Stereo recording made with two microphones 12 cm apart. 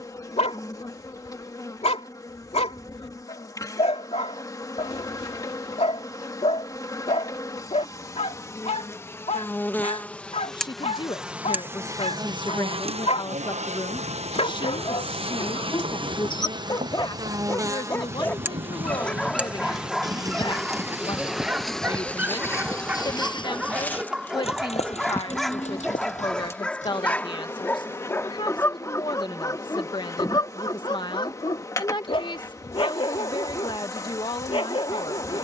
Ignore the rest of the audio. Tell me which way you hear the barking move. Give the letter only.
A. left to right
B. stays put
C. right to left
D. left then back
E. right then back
E.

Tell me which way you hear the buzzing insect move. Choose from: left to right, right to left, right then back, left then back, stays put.
right then back.